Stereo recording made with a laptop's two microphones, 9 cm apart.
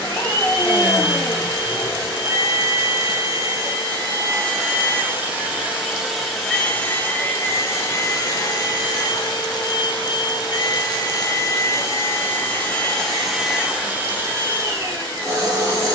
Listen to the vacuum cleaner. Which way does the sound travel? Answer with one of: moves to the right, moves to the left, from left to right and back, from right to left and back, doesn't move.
from right to left and back.